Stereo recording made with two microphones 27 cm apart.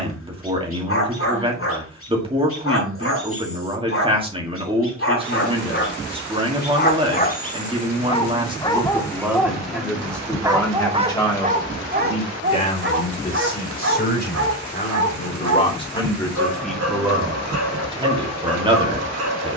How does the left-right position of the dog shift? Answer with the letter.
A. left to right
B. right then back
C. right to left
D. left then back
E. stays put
A.